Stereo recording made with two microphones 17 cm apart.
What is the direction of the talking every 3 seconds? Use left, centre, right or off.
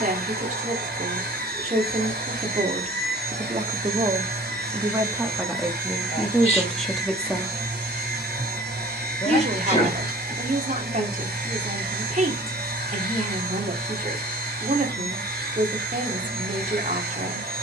right, right, centre, right, right, right.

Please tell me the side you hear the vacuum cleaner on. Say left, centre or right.
right.